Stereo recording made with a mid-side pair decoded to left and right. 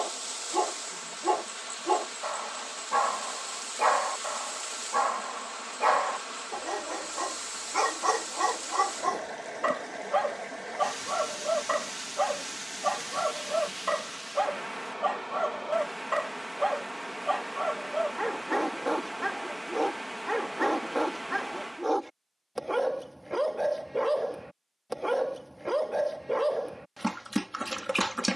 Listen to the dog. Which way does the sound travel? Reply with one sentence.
In this clip you hear the dog stay in one place.